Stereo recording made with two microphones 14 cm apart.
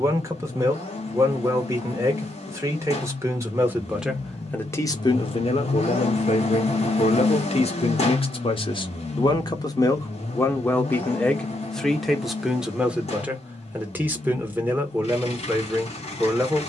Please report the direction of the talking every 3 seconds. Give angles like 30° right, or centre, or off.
20° right, 10° left, 50° left, 20° left, 10° right, 10° right.